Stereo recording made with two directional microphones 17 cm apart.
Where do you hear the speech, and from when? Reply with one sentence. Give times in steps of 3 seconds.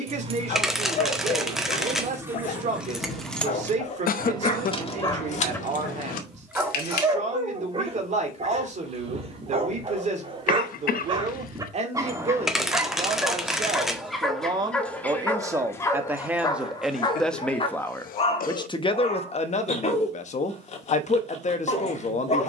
You can hear the speech on the right from 0 s, in the centre from 15 s and on the left from 18 s.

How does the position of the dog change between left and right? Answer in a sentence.
You can hear the dog go right and come back.